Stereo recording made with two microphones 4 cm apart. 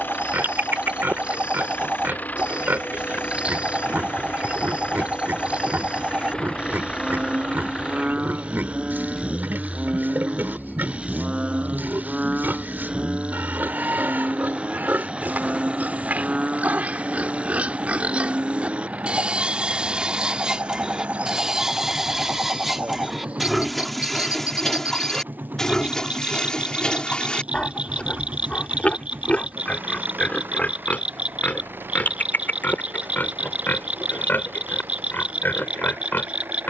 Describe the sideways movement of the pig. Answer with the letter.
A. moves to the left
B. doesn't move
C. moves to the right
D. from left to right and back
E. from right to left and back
A.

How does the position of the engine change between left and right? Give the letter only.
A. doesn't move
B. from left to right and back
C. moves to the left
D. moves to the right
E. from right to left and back
D.